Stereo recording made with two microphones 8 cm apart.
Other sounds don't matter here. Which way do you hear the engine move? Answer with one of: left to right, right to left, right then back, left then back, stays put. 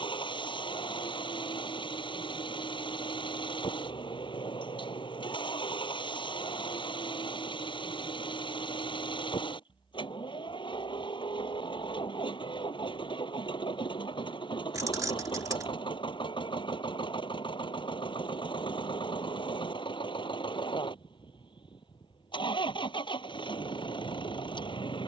stays put.